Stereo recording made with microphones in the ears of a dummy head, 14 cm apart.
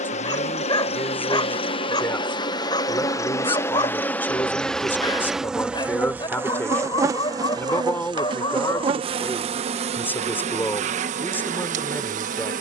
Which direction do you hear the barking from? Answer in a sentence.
In this clip you hear the barking on the left.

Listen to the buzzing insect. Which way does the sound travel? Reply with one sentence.
In this clip you hear the buzzing insect travel towards the right.